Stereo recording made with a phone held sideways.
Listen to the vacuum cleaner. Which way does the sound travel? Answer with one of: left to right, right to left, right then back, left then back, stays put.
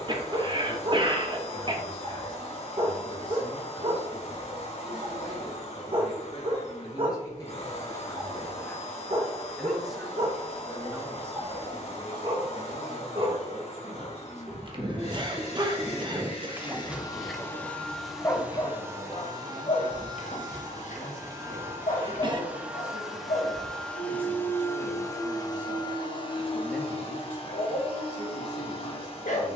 right then back.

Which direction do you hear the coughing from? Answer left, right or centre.
right.